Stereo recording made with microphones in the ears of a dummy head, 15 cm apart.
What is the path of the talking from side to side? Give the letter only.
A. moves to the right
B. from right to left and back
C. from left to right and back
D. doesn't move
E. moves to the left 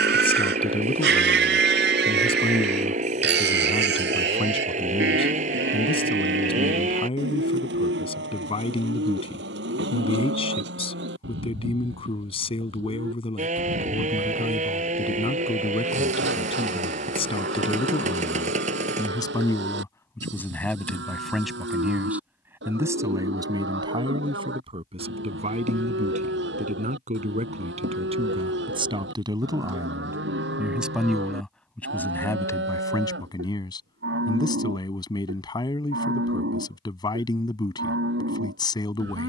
C.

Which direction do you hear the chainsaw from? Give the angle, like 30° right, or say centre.
40° right.